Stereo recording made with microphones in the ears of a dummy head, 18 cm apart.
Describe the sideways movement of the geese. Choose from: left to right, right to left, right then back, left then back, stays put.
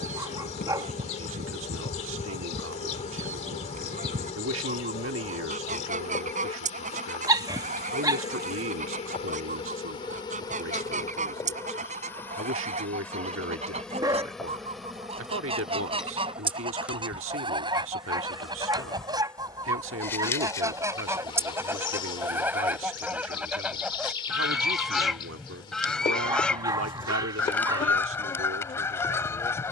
right to left.